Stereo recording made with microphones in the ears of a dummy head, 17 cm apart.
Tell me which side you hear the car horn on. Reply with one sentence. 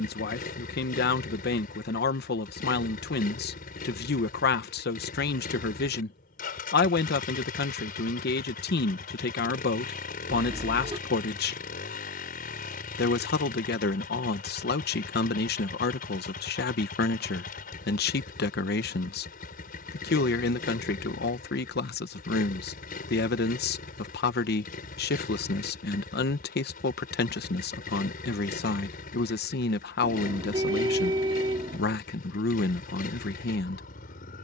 In this clip you hear the car horn on the right.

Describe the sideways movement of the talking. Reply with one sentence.
In this clip you hear the talking stay put.